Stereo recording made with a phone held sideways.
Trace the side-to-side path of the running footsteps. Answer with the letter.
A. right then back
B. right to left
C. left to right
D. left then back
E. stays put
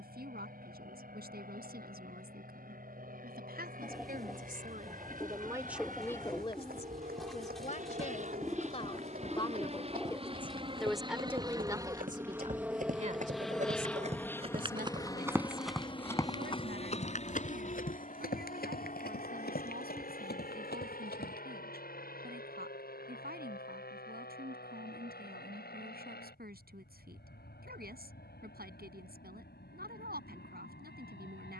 B.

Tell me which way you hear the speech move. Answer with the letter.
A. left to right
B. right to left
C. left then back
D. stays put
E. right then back
C.